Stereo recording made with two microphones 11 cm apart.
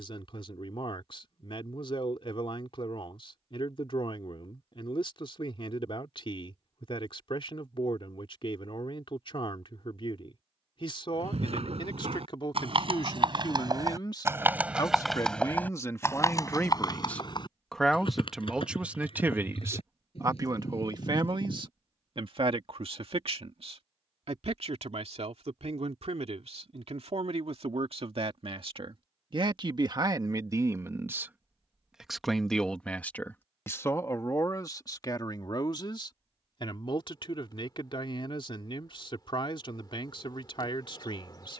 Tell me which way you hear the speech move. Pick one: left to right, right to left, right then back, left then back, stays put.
right then back.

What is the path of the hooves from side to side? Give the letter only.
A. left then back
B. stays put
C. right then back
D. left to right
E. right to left
E.